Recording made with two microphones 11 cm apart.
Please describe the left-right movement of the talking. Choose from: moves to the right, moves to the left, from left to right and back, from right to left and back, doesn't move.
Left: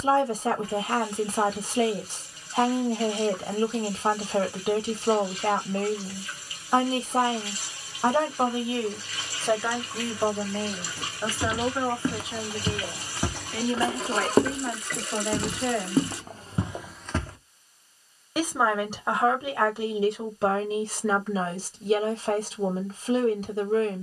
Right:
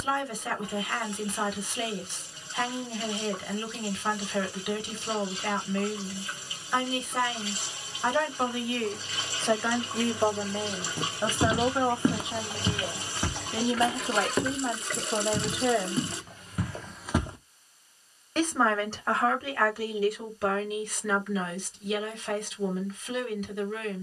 from left to right and back.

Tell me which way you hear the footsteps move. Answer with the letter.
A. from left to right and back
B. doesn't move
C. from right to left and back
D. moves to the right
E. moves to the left
C.